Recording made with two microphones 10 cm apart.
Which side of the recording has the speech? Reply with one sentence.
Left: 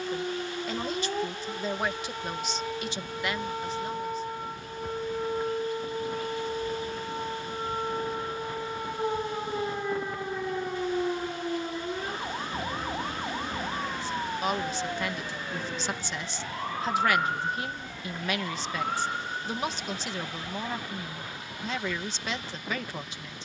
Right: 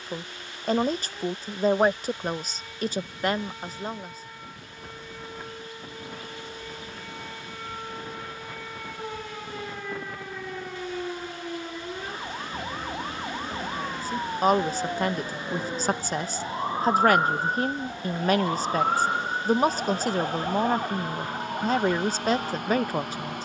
You can hear the speech on the right.